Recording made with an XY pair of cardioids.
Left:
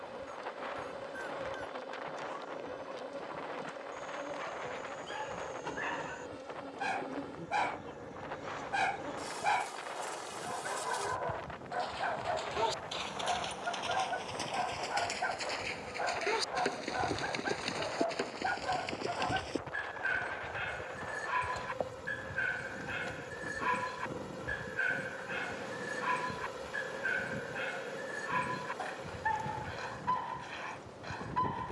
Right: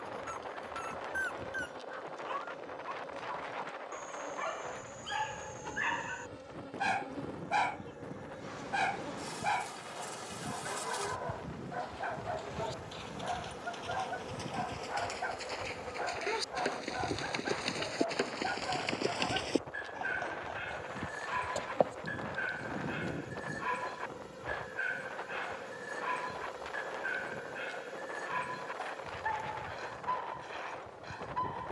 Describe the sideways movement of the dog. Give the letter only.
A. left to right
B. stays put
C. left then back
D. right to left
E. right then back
D.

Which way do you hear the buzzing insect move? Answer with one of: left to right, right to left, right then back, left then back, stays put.
right then back.